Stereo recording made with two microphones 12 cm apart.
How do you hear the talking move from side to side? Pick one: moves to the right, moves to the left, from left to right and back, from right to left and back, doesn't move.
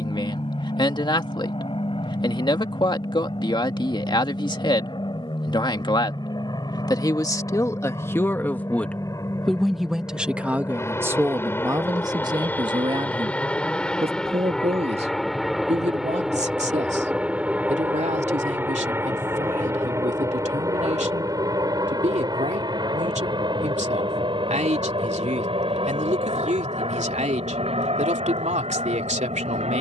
moves to the right.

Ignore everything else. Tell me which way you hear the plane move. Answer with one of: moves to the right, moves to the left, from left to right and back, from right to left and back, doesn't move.
moves to the right.